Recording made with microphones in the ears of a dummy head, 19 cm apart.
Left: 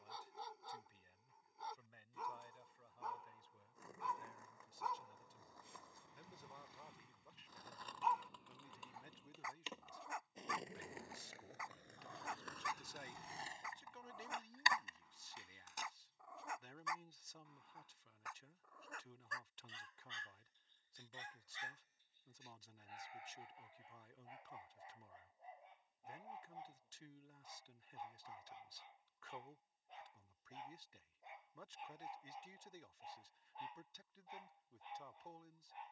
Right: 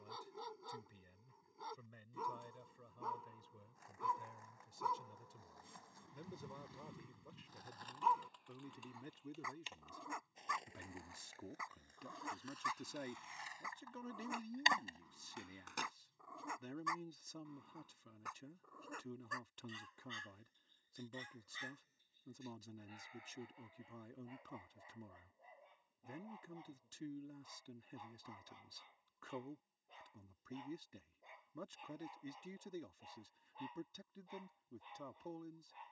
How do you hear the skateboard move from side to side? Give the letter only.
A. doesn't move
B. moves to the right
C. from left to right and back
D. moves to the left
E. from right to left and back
B.